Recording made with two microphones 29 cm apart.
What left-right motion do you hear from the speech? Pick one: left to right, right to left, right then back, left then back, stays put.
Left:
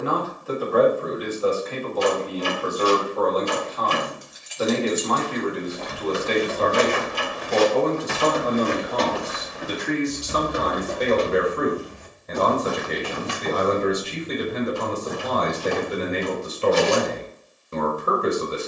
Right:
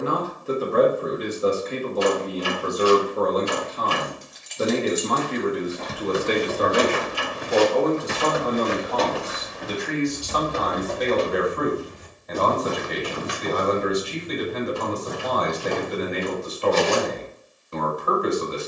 right to left.